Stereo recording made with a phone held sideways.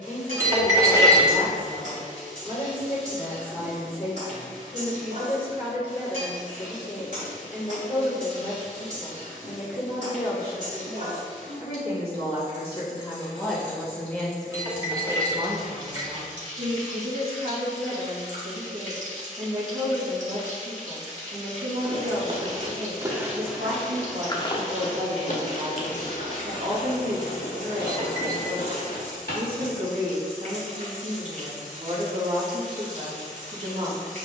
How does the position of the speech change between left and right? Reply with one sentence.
In this clip you hear the speech travel towards the right.